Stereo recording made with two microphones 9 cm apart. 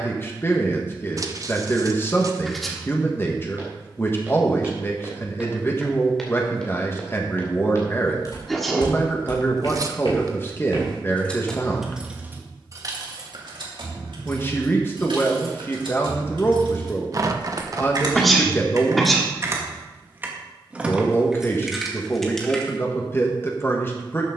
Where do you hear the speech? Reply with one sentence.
In this clip you hear the speech on the left.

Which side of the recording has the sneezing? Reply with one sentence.
You can hear the sneezing in the centre.